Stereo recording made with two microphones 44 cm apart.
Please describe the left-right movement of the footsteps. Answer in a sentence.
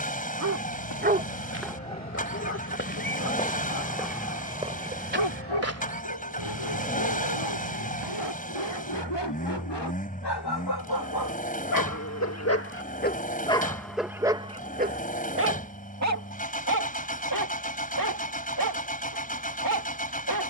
In this clip you hear the footsteps go from the left side to the right.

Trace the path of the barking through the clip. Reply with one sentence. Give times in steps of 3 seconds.
In this clip you hear the barking in the centre from 0 s, on the left from 3 s, in the centre from 12 s and on the right from 15 s.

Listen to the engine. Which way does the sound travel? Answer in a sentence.
You can hear the engine stay put.